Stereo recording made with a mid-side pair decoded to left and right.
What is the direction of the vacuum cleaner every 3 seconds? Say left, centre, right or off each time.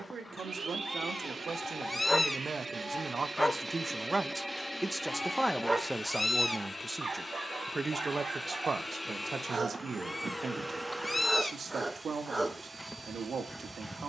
right, centre, left, centre, right.